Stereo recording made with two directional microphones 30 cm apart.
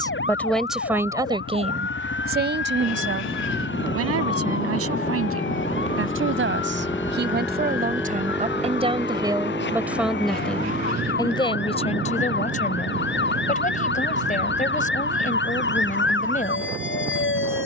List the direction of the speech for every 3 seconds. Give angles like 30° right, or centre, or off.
20° right, 50° right, 30° right, centre, 30° left, 30° left.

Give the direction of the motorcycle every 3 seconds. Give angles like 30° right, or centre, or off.
50° left, 30° left, centre, 20° right, 40° right, 50° right.